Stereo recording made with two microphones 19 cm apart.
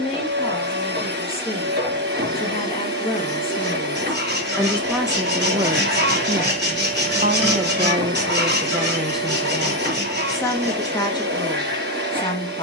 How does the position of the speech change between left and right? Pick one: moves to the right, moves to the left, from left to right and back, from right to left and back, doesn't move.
from left to right and back.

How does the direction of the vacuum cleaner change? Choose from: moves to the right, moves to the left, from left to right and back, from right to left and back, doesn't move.
doesn't move.